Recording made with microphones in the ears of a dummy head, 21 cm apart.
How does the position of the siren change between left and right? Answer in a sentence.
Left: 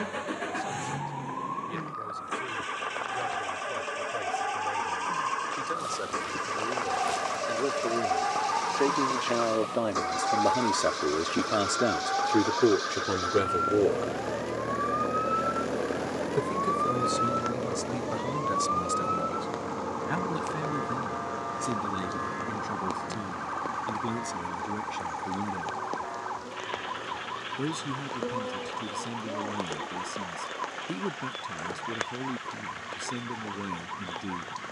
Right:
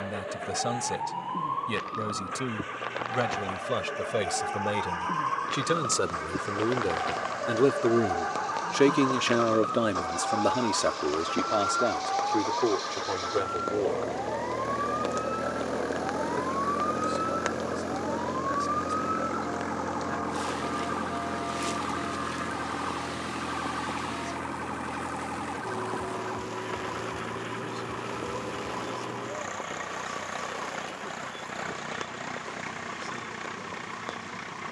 You can hear the siren move from right to left.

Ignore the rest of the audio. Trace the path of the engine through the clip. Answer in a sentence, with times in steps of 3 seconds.
You can hear the engine on the left from 0 s, in the centre from 12 s and on the right from 18 s.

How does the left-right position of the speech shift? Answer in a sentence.
In this clip you hear the speech move to the left.